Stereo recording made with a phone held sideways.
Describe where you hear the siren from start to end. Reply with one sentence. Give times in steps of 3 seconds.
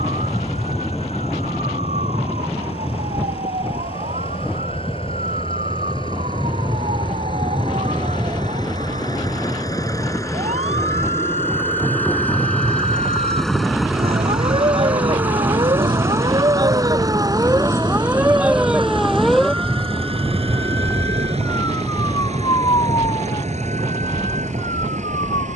You can hear the siren on the right from 0 s, in the centre from 18 s and on the left from 21 s.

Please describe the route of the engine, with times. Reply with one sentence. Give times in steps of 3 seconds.
You can hear the engine on the left from 0 s, in the centre from 12 s and on the right from 15 s.